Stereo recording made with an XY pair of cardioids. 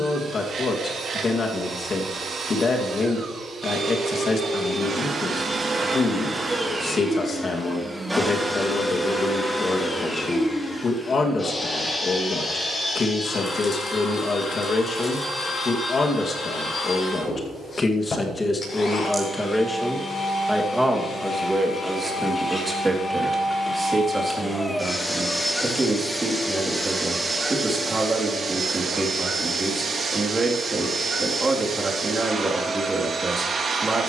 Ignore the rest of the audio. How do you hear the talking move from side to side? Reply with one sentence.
In this clip you hear the talking go from the left side to the right.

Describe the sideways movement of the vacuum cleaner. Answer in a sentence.
In this clip you hear the vacuum cleaner go left and come back.